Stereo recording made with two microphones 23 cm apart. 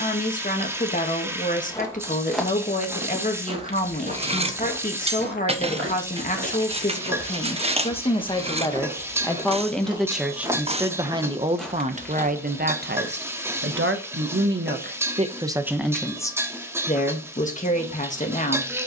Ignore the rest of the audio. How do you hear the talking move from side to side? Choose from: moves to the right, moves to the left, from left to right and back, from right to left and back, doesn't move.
from left to right and back.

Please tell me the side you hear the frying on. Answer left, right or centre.
centre.